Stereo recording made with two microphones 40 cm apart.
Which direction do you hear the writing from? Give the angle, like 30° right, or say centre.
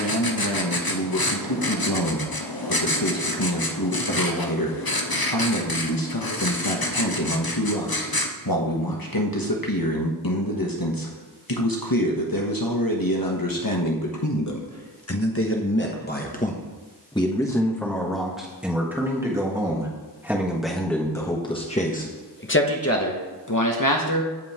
60° left.